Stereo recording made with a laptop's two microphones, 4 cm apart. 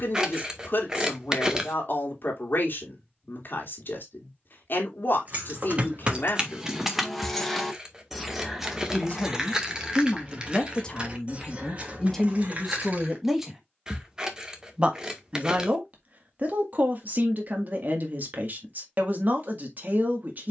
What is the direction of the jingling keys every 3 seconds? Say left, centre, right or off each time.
off, right, centre, right, right, off, off.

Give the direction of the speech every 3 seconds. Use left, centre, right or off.
left, left, left, left, centre, right, right.